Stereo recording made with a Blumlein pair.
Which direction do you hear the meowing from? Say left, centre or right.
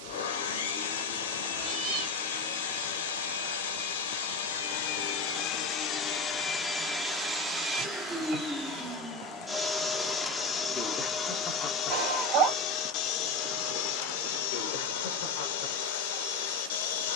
right.